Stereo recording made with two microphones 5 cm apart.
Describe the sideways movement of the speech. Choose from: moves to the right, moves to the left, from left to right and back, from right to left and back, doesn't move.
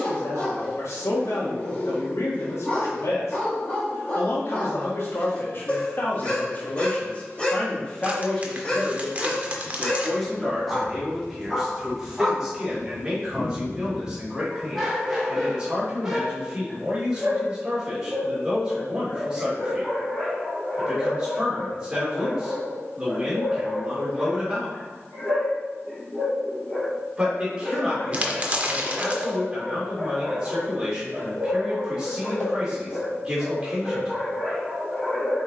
moves to the right.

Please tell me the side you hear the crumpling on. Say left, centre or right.
right.